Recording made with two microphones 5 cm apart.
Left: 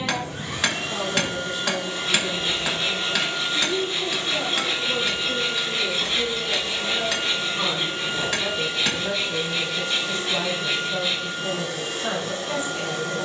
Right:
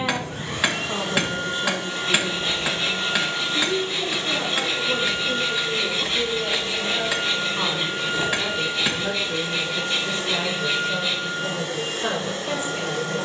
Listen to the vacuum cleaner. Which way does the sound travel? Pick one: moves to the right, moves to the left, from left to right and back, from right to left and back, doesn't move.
doesn't move.